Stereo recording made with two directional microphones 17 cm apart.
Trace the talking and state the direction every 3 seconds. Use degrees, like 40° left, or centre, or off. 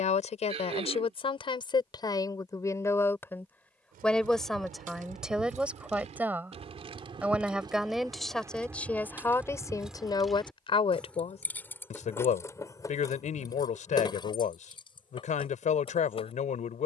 30° left, centre, centre, 30° left, 50° left, 50° left.